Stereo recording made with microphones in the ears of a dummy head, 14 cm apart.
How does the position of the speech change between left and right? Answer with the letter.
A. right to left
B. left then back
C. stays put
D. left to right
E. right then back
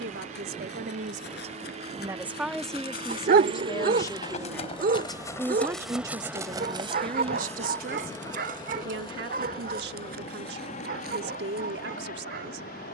B.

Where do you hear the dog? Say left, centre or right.
right.